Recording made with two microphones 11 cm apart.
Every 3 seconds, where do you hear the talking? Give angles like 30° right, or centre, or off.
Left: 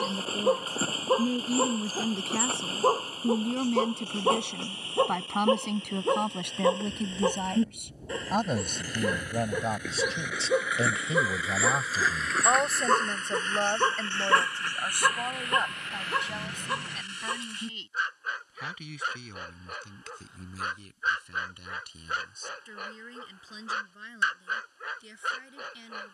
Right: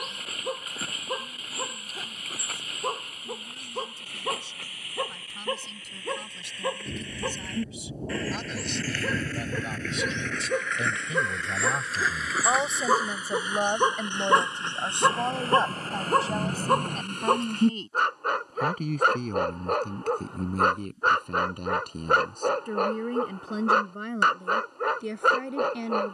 80° left, 70° left, 60° left, 30° left, 10° right, 30° right, 50° right, 60° right, 60° right.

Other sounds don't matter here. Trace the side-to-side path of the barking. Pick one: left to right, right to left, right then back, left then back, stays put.
left to right.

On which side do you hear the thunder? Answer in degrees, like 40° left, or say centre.
40° right.